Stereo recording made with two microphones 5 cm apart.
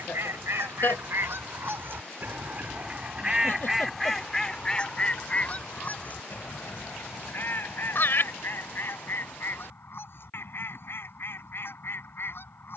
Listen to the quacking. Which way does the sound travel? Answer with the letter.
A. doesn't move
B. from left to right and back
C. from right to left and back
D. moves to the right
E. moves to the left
E.